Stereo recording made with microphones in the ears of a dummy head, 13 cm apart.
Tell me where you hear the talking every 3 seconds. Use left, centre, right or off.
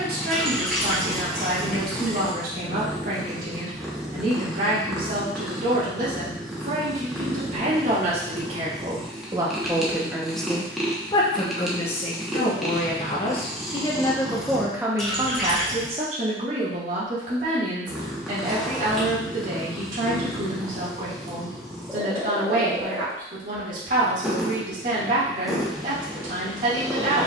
right, right, right, centre, left, right, right, right, right.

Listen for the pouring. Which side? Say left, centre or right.
centre.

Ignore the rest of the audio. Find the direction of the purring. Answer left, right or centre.
centre.